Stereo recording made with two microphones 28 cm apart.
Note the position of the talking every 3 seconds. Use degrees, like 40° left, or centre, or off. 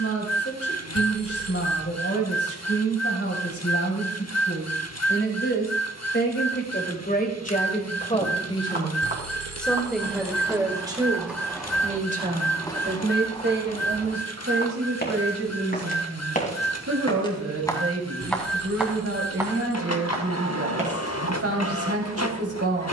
50° left, 50° left, 30° left, 10° right, 40° right, 50° right, 50° right, 50° right.